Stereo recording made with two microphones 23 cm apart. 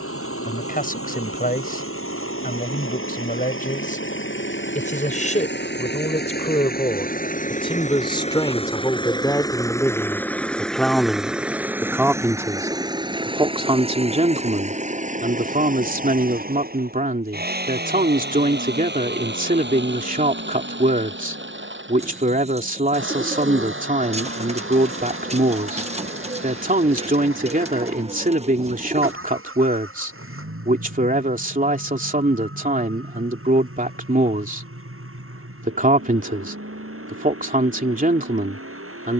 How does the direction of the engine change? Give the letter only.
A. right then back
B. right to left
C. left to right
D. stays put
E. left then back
C.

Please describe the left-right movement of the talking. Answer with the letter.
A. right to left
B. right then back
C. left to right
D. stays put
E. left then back
C.